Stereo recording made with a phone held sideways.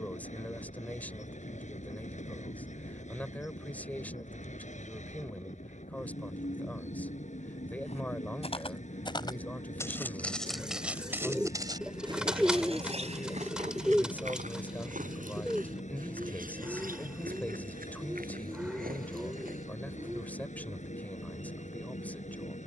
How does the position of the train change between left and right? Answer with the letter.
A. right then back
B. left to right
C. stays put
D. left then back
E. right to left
C.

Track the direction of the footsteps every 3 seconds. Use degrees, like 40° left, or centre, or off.
off, off, 40° left, centre, 50° right, 70° right, 80° right, off.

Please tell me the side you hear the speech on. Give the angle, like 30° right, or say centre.
10° left.